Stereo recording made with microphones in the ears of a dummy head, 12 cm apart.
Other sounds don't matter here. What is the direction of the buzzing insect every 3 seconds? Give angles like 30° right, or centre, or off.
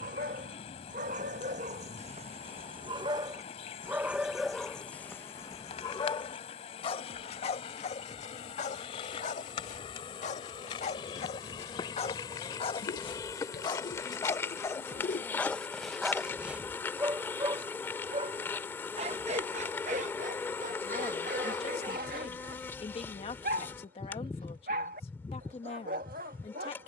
50° left, 50° left, 40° left, 40° left, 20° left, 20° left, 20° left, 20° left, 20° left.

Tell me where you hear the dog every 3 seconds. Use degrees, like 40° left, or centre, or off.
50° right, centre, 50° left, 50° left, 30° left, 10° right, 50° right, 70° right, 70° right.